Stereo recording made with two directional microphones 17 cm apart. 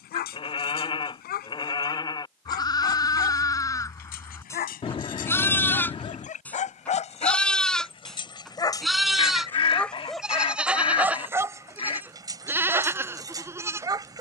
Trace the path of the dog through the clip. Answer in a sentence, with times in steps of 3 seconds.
You can hear the dog on the left from 0 s, in the centre from 9 s and on the right from 12 s.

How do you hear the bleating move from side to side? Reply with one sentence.
You can hear the bleating move from left to right.